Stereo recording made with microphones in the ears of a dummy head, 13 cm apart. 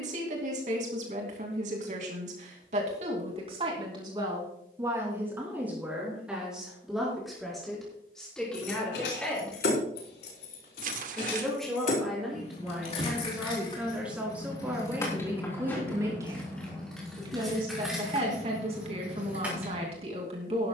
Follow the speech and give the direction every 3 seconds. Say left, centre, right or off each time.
right, right, centre, centre, centre, right, right.